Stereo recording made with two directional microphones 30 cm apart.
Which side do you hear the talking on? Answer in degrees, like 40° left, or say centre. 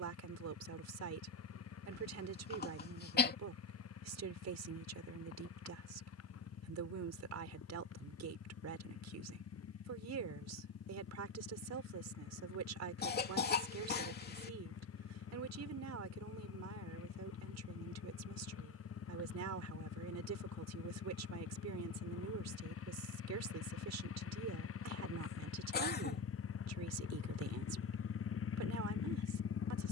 60° right.